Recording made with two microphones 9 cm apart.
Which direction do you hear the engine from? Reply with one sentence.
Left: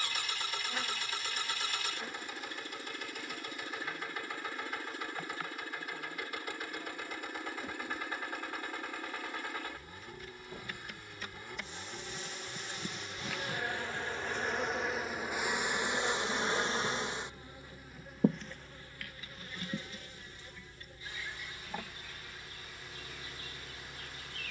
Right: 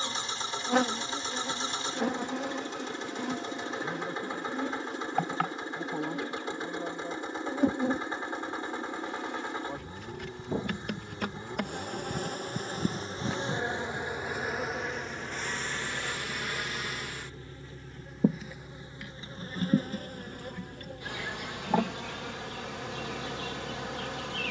In this clip you hear the engine on the right.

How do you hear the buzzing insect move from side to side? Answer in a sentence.
In this clip you hear the buzzing insect move from right to left and back again.